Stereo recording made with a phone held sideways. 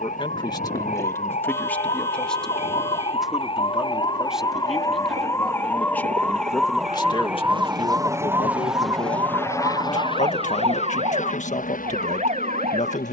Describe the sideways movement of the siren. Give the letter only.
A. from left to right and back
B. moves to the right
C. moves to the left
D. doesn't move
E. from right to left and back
B.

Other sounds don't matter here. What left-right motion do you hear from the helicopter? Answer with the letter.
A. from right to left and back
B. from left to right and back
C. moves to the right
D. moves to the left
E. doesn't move
D.